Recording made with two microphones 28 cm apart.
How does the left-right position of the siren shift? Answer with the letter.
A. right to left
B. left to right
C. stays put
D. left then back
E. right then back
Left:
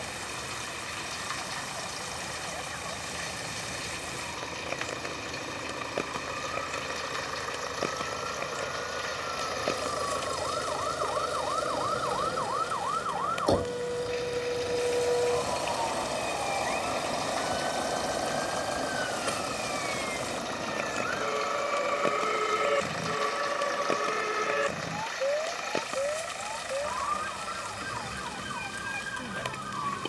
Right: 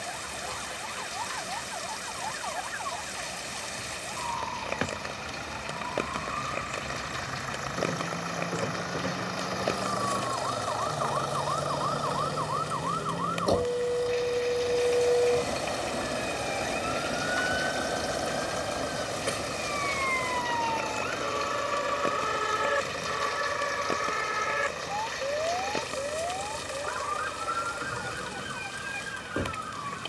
A.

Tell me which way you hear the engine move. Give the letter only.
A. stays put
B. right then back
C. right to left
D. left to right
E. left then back
D.